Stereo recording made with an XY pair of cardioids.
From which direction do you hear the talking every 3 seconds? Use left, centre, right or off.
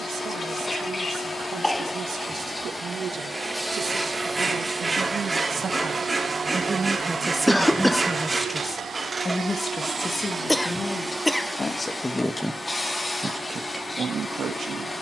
right, right, centre, left, right.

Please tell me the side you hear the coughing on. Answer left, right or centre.
centre.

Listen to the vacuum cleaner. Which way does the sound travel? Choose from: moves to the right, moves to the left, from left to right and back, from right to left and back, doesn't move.
from left to right and back.